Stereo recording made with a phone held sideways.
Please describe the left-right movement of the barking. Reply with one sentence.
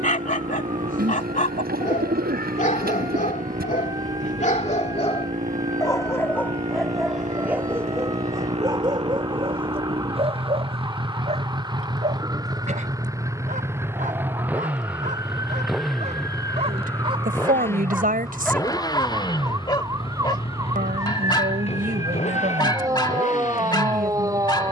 You can hear the barking go right and come back.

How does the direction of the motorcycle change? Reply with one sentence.
You can hear the motorcycle move from right to left.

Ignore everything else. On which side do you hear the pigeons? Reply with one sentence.
In this clip you hear the pigeons on the right.